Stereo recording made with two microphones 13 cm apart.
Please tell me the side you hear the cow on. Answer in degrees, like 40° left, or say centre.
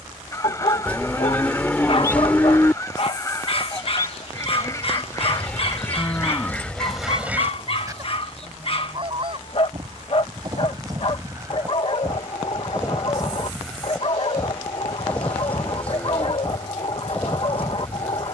10° left.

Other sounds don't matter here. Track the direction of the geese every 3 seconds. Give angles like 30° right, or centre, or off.
20° left, 20° left, 10° right, 30° right, centre, 10° left.